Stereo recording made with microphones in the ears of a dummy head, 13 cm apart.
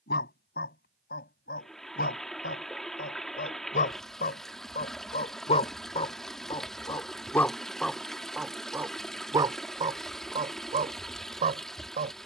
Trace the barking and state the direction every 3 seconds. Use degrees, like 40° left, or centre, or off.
70° left, 50° left, 10° left, 40° right.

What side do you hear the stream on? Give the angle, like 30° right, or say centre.
centre.